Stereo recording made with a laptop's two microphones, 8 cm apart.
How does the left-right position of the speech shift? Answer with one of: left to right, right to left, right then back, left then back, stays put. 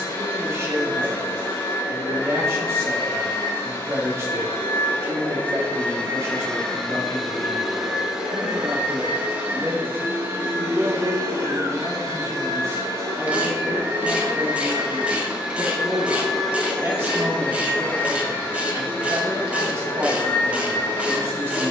stays put.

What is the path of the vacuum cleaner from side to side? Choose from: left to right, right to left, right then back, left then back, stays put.
right then back.